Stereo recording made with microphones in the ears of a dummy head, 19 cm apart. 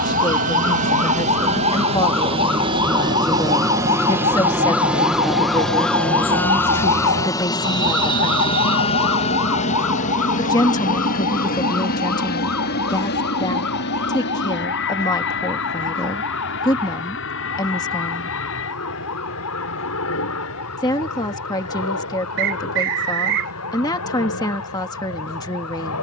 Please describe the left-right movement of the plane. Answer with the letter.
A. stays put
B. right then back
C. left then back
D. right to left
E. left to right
D.